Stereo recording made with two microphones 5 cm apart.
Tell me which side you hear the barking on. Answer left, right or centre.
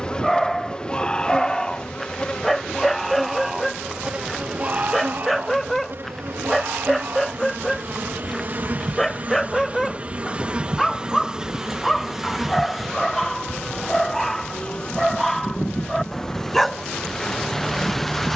centre.